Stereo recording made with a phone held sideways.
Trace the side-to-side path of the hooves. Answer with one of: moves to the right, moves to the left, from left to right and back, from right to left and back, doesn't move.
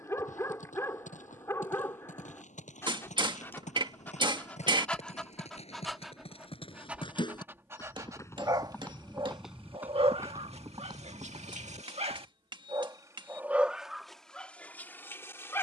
moves to the right.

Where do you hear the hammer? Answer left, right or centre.
right.